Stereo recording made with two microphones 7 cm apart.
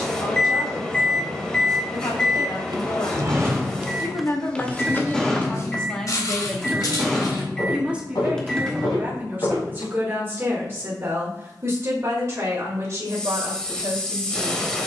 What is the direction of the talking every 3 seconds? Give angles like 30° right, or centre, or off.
70° left, 30° left, 10° right, 30° right, 40° right.